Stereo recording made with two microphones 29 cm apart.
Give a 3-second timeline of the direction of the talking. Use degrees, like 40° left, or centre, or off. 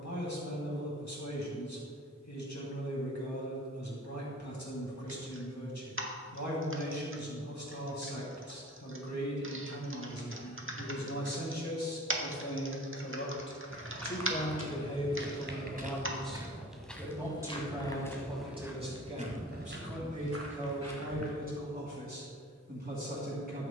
80° left, 80° left, 80° left, 70° left, 40° left, centre, 20° right, 30° right.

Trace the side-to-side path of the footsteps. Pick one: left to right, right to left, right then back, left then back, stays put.
left then back.